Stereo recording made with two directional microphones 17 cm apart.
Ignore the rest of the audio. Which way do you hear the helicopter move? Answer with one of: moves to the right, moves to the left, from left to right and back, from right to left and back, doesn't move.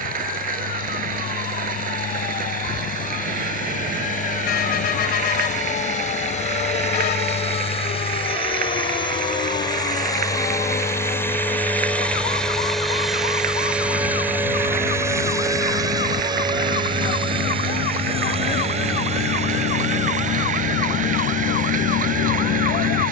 moves to the right.